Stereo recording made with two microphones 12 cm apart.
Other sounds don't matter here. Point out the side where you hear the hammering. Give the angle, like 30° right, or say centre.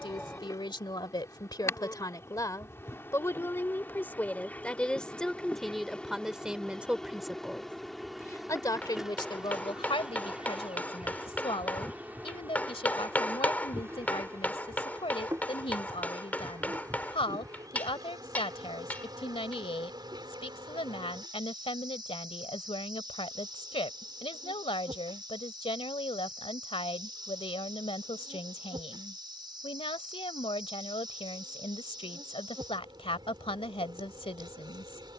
10° left.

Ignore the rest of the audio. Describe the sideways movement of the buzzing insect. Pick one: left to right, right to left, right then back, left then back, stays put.
left to right.